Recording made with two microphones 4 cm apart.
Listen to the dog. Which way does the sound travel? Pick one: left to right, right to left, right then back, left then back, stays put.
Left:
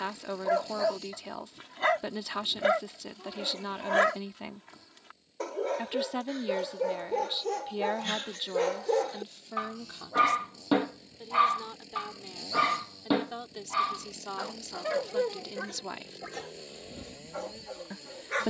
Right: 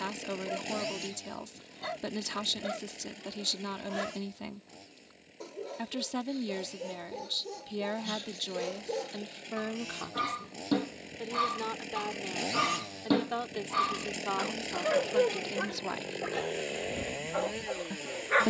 left to right.